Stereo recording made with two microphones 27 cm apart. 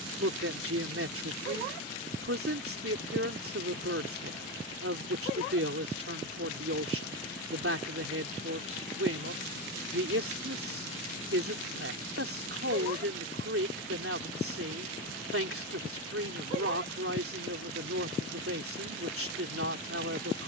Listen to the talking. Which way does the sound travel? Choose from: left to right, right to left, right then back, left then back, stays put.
stays put.